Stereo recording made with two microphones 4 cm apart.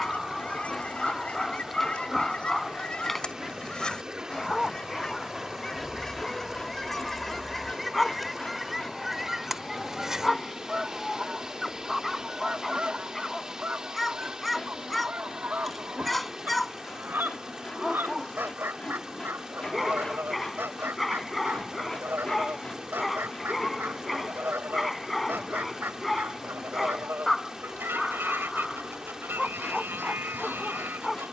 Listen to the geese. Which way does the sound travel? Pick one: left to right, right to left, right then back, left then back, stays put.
left to right.